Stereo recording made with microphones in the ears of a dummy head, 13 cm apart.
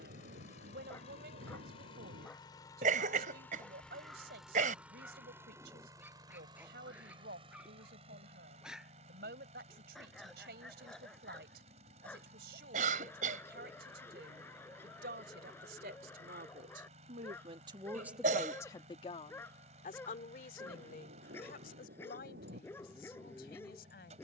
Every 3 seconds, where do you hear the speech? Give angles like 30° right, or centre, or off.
80° right, 80° right, 80° right, 80° right, 80° right, 60° right, 40° left, 70° left.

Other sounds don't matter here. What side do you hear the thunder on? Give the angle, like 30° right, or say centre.
80° right.